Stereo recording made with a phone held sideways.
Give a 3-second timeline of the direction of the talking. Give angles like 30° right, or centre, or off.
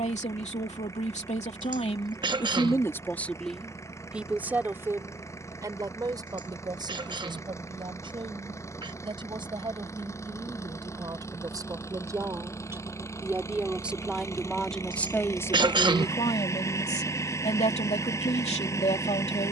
50° left, 10° right, 30° right, 30° right, 10° right, 40° left, 50° left.